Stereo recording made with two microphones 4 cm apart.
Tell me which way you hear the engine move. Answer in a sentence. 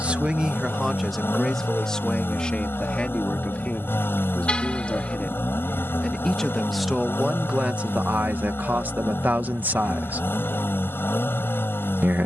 In this clip you hear the engine stay in one place.